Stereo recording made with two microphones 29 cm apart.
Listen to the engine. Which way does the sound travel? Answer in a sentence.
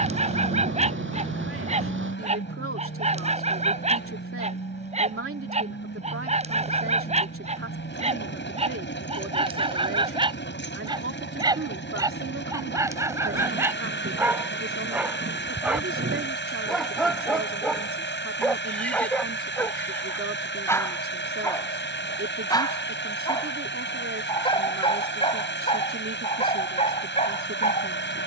In this clip you hear the engine stay in one place.